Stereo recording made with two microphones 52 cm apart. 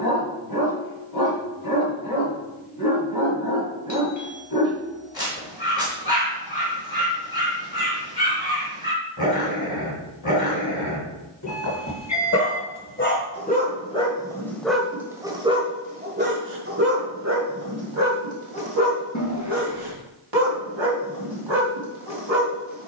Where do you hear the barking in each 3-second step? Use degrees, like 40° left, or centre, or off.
40° left, 40° left, 40° left, 40° left, 20° left, 20° right, 50° right, 60° right.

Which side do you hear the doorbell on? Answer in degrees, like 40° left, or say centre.
30° left.